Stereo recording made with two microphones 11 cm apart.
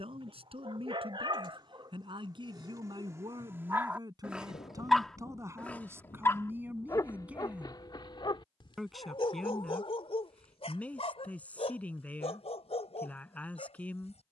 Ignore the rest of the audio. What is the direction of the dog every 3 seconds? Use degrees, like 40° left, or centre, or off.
40° right, 10° right, 40° left, 60° left, 70° left.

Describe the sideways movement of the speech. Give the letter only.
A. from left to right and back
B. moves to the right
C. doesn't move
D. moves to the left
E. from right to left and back
D.